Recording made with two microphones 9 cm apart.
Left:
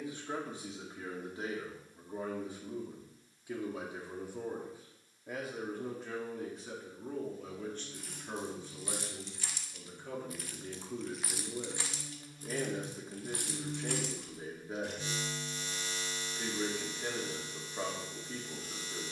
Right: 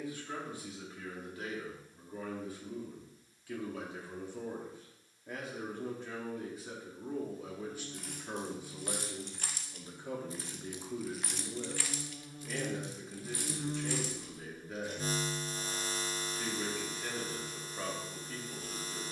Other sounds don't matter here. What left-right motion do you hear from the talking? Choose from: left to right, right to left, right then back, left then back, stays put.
right then back.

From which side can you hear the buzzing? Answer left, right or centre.
right.